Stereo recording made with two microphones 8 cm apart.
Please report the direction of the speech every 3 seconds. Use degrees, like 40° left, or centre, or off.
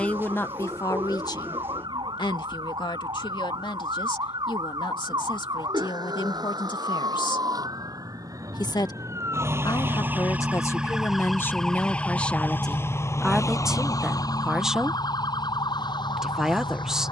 50° left, 80° left, 70° left, 40° left, centre, 10° right.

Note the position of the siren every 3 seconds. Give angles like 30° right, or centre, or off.
70° right, 60° right, 50° right, 10° right, 40° left, 60° left.